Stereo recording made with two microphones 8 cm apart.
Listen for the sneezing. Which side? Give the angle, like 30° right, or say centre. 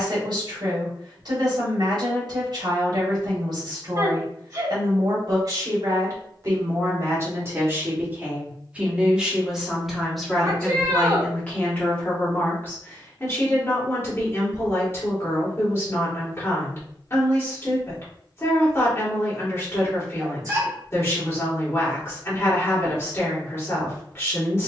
40° right.